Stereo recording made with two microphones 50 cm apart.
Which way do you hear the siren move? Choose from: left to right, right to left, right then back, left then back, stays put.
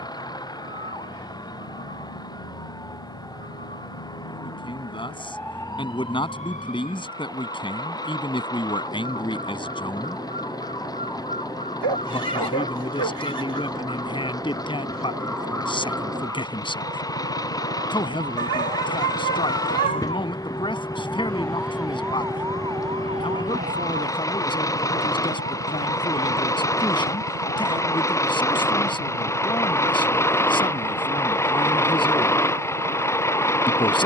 left to right.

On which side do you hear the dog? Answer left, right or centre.
right.